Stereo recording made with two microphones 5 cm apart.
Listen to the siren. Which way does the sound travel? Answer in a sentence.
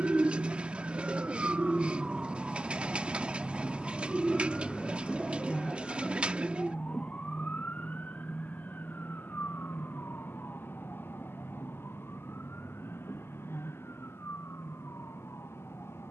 In this clip you hear the siren go from the right side to the left.